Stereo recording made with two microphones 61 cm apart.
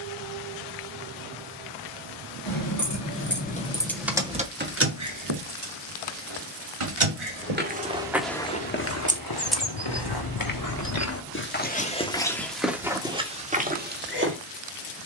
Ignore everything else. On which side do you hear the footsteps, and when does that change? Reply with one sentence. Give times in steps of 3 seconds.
In this clip you hear the footsteps not at all from 0 s, in the centre from 6 s, on the left from 9 s and in the centre from 12 s.